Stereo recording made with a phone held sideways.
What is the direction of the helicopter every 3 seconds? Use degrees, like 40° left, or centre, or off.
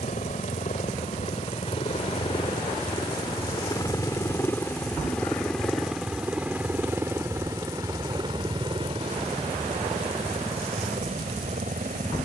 40° left, 10° left, 20° right, 40° right.